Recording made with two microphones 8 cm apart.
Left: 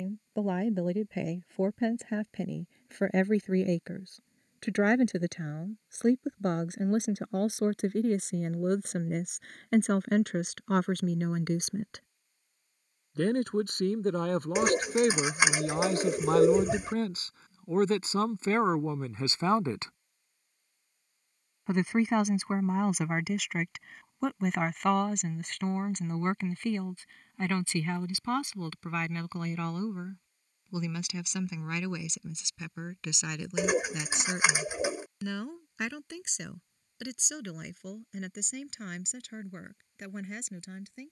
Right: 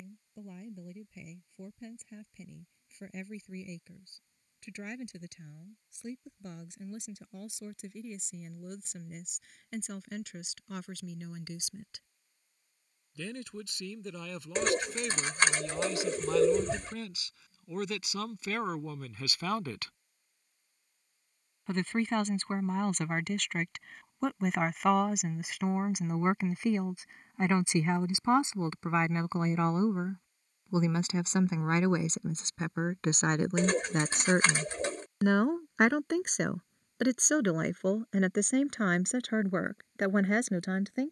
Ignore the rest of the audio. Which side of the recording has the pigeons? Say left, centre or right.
centre.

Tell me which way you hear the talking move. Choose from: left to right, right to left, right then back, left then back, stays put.
left to right.